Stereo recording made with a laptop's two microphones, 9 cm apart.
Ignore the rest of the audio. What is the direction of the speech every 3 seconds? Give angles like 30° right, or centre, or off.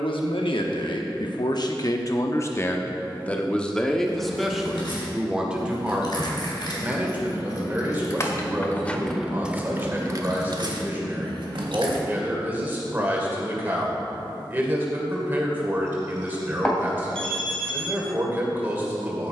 50° left, centre, 20° right, 20° right, 20° right, 20° right, 20° right.